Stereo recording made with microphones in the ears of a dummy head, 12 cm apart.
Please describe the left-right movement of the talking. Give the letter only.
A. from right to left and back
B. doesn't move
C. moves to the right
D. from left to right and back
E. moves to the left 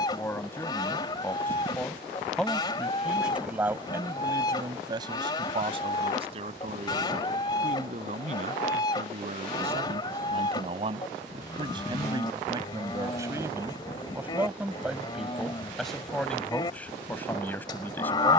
D.